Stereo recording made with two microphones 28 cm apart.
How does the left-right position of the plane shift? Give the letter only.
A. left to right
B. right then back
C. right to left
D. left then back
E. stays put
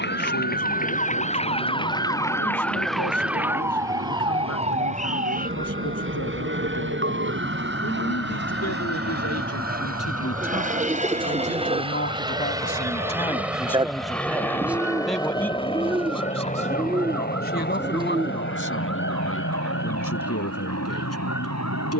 C.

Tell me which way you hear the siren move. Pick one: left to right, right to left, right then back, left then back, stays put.
left to right.